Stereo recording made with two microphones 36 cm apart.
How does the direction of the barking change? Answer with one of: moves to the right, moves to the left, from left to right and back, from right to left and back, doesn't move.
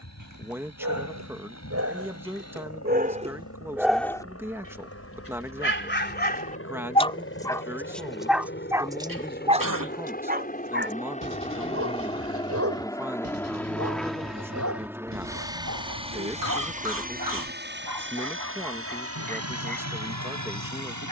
from right to left and back.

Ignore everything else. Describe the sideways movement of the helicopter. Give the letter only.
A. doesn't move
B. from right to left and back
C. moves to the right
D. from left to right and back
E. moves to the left
C.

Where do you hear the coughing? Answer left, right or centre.
right.